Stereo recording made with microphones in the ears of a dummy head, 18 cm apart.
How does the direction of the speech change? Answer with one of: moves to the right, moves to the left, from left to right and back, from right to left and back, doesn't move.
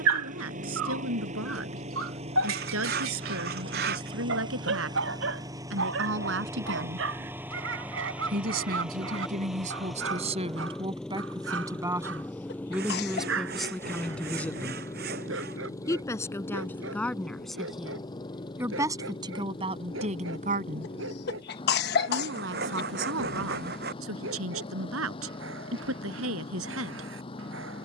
from right to left and back.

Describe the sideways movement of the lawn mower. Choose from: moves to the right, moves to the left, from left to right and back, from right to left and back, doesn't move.
moves to the left.